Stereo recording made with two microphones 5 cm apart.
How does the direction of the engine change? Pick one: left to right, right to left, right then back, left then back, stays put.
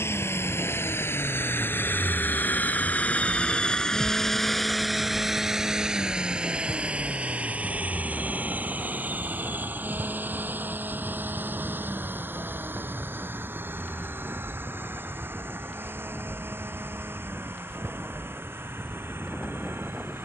left to right.